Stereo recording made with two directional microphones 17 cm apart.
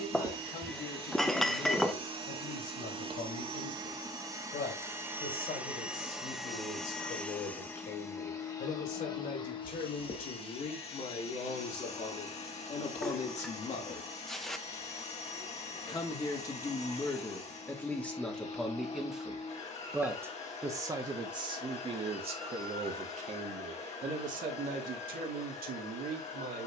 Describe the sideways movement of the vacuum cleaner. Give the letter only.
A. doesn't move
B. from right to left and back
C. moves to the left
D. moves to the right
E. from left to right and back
C.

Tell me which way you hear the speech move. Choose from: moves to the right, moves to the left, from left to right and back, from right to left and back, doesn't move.
moves to the right.